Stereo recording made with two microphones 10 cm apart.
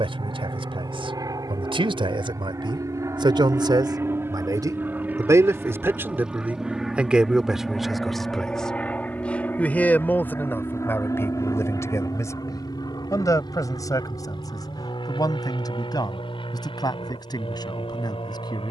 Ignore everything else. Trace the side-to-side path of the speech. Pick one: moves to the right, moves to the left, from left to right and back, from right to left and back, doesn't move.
moves to the left.